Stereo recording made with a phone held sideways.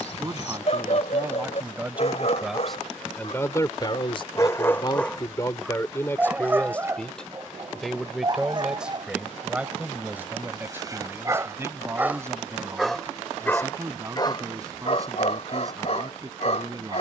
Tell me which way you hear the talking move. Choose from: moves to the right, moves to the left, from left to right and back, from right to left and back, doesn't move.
from right to left and back.